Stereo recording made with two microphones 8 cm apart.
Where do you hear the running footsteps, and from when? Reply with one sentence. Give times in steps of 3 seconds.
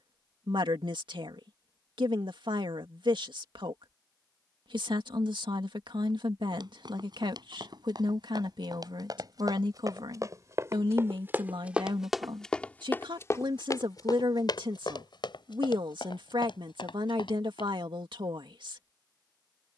In this clip you hear the running footsteps not at all from 0 s, on the right from 6 s, on the left from 12 s and not at all from 18 s.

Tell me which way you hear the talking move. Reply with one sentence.
You can hear the talking stay put.